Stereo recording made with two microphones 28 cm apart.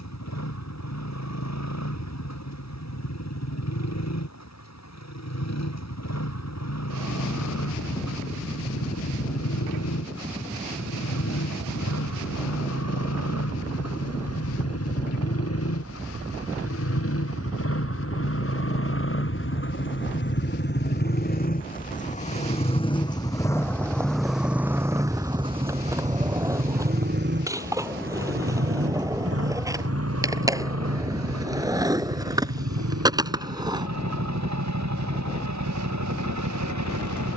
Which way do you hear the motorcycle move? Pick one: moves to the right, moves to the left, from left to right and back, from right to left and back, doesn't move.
moves to the right.